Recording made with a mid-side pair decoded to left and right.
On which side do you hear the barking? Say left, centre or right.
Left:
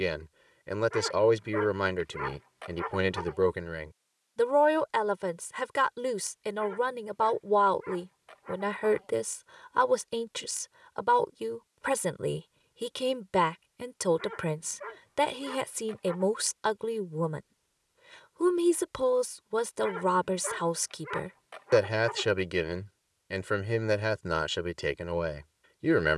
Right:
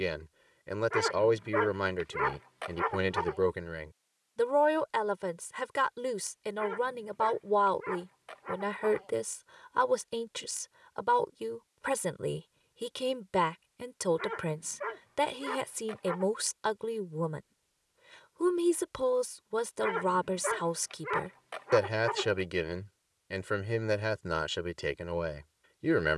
right.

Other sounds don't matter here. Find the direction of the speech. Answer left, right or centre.
centre.